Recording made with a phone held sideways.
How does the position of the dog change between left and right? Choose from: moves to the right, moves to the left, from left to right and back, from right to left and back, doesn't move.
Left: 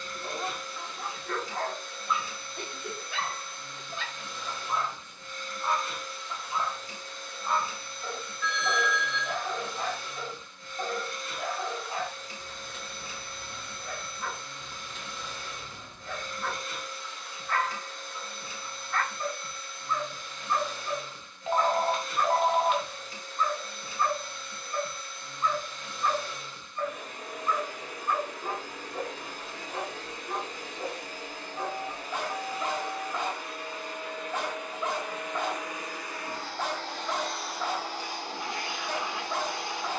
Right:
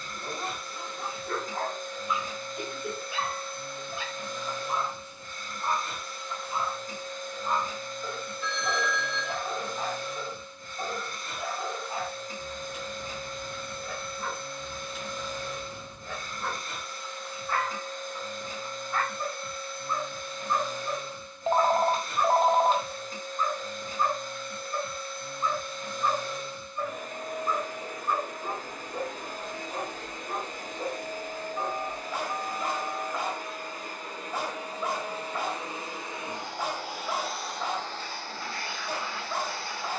doesn't move.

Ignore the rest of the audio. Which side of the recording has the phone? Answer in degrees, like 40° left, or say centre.
40° right.